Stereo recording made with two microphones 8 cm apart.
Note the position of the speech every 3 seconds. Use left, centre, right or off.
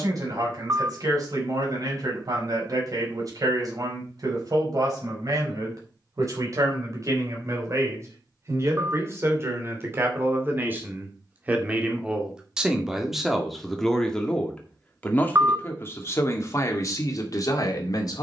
right, right, right, right, centre, left.